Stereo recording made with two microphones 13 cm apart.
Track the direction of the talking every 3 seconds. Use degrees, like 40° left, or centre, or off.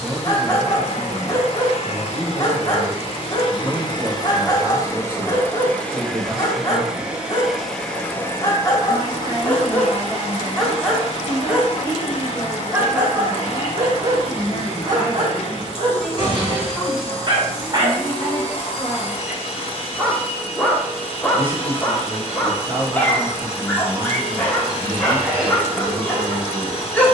40° right, 40° right, 40° right, 40° right, 10° right, centre, 10° right, 40° right, 40° right.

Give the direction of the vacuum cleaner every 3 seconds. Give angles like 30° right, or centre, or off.
50° left, 30° left, 10° left, 40° left, 50° left, 50° left, 50° left, 50° left, 50° left.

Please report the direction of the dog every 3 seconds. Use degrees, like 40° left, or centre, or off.
30° left, 30° left, 30° left, 10° left, 20° right, 40° right, centre, 10° left, 10° left.